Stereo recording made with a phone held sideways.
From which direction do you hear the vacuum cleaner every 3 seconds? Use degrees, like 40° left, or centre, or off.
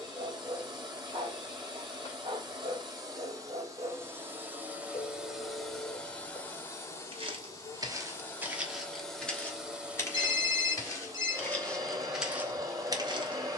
30° right, 10° right, 20° left, 10° right, 30° right.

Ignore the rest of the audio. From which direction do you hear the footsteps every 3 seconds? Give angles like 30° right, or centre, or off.
off, off, 20° right, 20° left, 20° right.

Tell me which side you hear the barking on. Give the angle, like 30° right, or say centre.
50° right.